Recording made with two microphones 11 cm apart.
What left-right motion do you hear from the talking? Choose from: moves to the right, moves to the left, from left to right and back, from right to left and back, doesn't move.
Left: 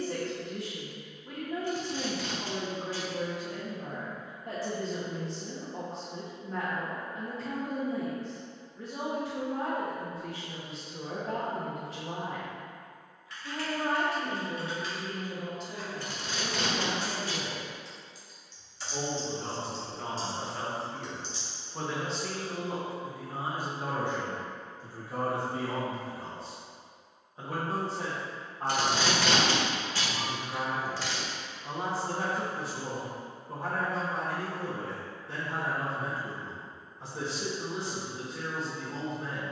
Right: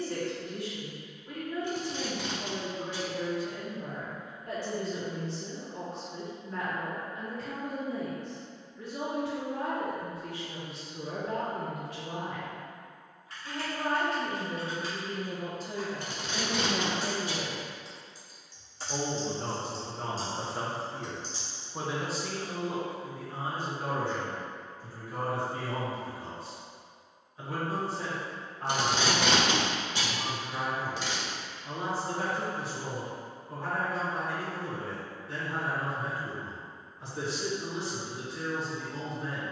from left to right and back.